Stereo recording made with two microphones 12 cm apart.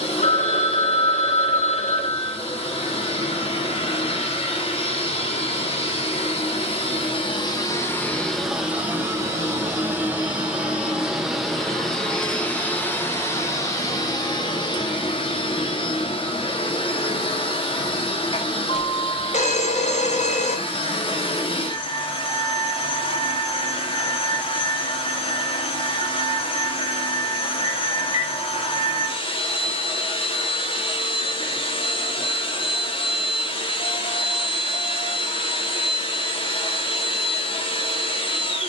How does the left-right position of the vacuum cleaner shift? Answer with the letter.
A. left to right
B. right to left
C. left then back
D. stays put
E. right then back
E.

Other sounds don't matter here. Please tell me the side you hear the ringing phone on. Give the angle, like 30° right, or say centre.
70° left.